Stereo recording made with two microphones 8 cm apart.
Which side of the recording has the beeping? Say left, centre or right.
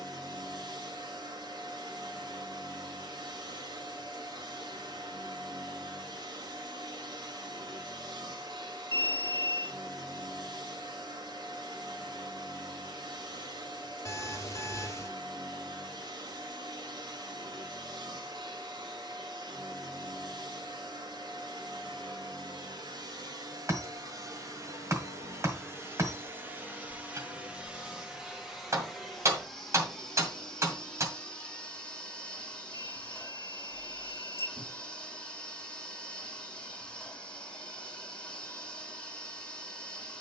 left.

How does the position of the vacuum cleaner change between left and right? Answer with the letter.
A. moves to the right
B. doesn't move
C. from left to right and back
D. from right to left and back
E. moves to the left
E.